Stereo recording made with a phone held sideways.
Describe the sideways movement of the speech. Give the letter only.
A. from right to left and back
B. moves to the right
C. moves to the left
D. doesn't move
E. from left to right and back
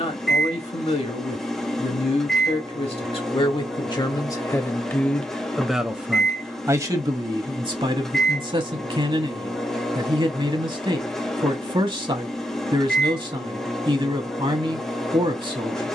B.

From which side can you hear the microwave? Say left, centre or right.
centre.